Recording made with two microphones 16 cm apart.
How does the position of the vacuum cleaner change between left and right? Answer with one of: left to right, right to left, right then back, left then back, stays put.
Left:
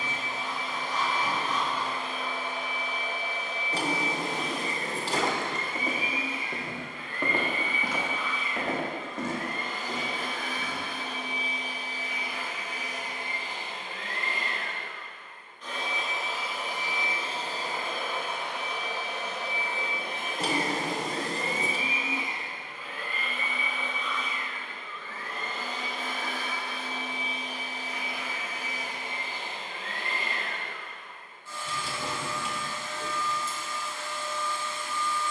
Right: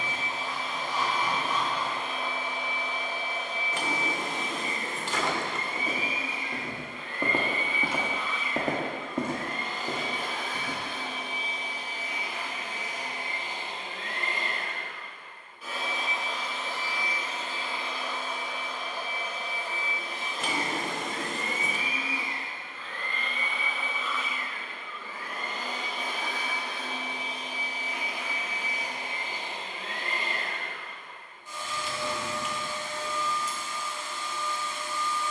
left then back.